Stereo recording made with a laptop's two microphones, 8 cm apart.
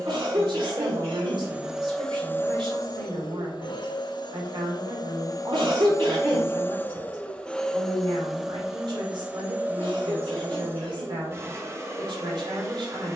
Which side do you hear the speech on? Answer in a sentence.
In this clip you hear the speech on the right.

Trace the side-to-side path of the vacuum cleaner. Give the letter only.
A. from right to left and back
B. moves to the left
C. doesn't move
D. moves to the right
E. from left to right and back
A.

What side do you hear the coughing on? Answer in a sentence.
You can hear the coughing on the right.